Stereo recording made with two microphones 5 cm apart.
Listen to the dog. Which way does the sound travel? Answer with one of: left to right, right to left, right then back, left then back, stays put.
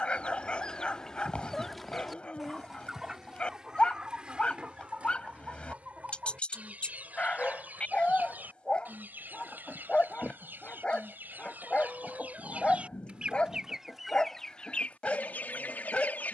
stays put.